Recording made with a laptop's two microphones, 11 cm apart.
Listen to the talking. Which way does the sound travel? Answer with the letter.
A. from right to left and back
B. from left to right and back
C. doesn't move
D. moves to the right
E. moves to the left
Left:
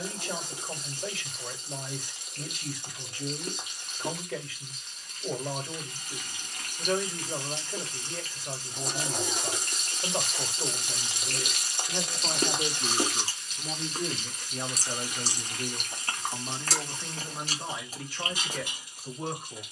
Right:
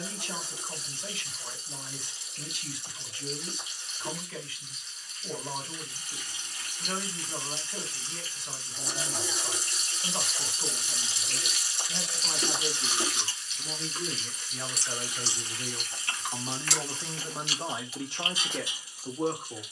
D.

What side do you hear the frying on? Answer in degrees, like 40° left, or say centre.
60° left.